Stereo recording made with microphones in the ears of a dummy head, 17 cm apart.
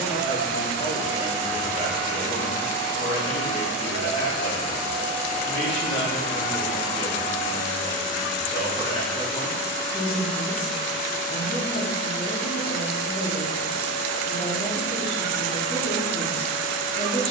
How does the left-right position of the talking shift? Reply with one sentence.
In this clip you hear the talking stay put.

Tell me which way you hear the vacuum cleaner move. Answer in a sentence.
In this clip you hear the vacuum cleaner stay put.